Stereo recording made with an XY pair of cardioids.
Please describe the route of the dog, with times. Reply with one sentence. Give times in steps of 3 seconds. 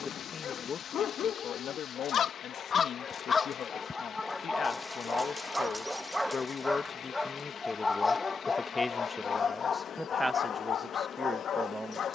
You can hear the dog on the left from 0 s, in the centre from 3 s and on the left from 9 s.